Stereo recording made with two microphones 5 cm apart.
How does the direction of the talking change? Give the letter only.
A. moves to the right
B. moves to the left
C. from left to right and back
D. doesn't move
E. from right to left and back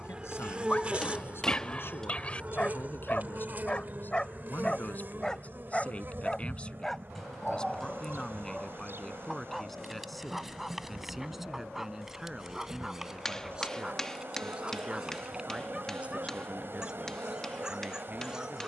A.